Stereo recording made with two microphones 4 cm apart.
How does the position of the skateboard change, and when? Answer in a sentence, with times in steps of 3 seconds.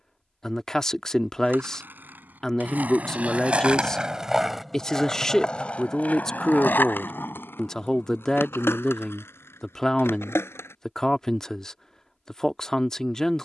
In this clip you hear the skateboard on the right from 0 s, in the centre from 3 s, on the left from 6 s and not at all from 12 s.